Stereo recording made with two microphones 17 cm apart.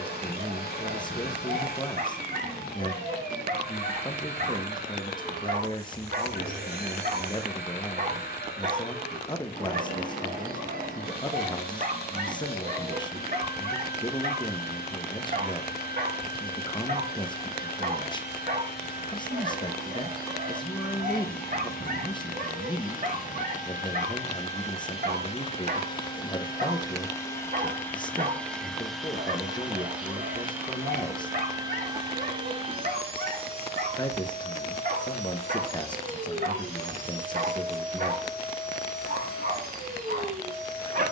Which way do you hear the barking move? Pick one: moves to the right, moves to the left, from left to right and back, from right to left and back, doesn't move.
doesn't move.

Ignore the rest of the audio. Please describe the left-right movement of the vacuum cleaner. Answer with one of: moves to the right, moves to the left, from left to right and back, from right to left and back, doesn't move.
moves to the right.